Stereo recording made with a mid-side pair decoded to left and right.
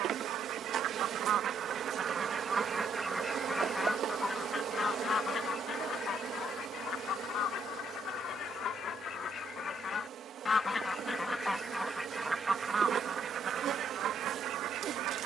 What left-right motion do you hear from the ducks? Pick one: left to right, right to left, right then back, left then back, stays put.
left then back.